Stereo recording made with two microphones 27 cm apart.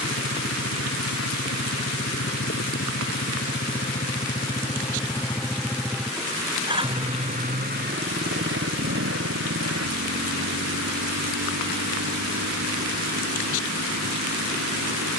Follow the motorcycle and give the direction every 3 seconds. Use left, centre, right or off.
left, left, right, right, right.